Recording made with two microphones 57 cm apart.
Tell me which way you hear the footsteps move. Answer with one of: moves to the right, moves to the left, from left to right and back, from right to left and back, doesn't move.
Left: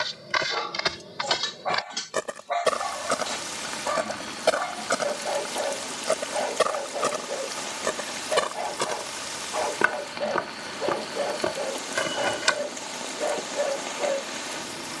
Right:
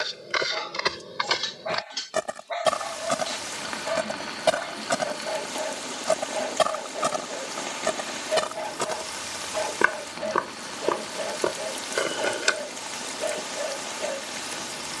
from left to right and back.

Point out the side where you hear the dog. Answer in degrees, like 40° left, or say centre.
70° left.